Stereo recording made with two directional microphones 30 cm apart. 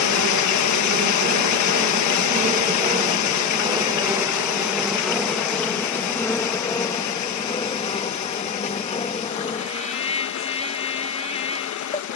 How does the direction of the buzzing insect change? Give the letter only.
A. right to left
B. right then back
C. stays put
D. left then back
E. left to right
A.